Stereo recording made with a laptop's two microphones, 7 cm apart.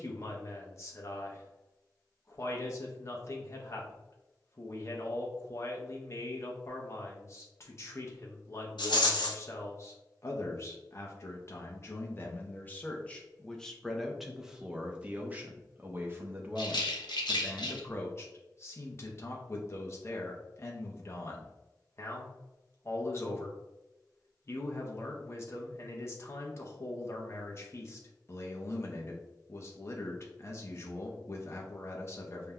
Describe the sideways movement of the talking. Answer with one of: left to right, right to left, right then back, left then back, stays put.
right then back.